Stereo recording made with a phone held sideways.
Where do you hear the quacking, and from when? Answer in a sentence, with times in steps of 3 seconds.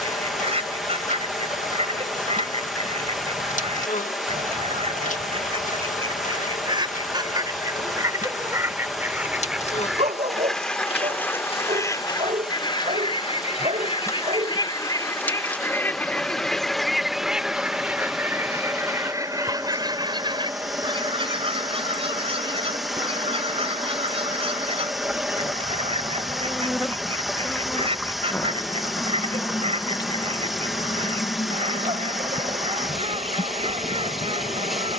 You can hear the quacking on the right from 0 s, in the centre from 9 s, on the left from 12 s, in the centre from 15 s and on the right from 18 s.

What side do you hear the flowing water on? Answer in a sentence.
In this clip you hear the flowing water in the centre.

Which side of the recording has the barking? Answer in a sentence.
You can hear the barking on the right.